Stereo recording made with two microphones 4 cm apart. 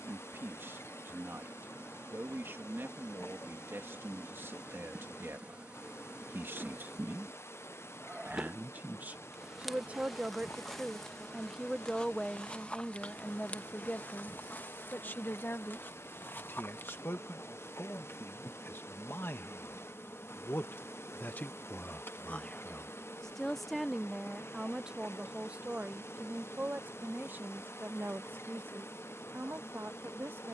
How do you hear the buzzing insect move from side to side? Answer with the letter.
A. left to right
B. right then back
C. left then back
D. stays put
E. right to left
E.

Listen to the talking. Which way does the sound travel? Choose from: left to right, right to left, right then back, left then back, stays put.
left then back.